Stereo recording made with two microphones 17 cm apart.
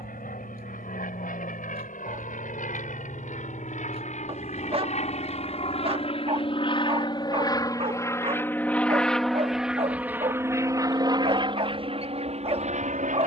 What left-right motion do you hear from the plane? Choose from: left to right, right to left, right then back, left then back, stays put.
left to right.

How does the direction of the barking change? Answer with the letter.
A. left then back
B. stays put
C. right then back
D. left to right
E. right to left
B.